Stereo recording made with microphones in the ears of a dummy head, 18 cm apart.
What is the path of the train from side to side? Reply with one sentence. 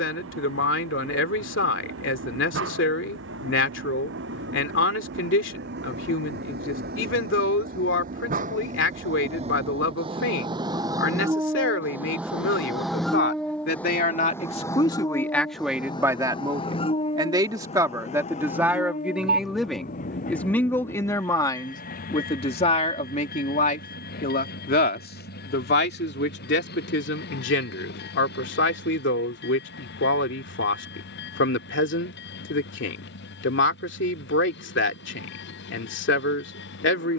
In this clip you hear the train go from the right side to the left.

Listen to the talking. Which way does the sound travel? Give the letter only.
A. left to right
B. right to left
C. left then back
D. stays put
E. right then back
E.